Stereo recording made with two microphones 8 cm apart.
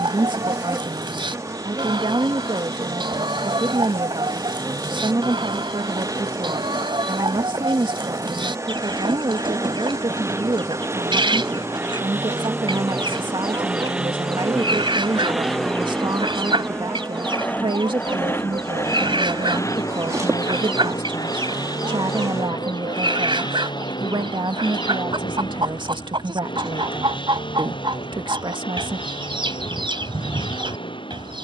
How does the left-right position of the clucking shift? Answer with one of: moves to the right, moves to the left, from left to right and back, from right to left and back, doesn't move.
doesn't move.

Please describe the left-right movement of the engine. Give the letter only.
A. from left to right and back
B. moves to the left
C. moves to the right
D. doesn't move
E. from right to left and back
B.